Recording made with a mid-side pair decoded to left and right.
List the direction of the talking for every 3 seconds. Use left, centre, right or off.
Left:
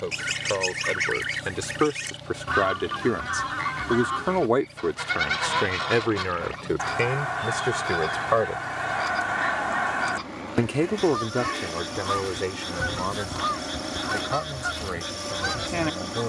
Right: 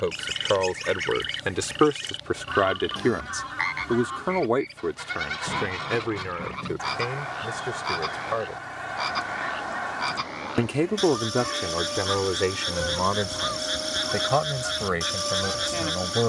right, left, left, centre, right, right.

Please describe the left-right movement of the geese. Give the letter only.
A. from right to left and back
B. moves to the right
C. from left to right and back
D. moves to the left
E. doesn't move
E.